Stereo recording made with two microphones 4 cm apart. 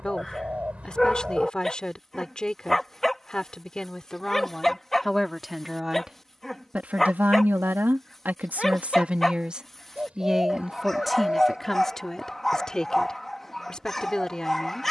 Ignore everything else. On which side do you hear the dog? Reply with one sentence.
You can hear the dog in the centre.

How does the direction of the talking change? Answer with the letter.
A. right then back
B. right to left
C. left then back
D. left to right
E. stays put
A.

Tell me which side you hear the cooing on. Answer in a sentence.
In this clip you hear the cooing on the right.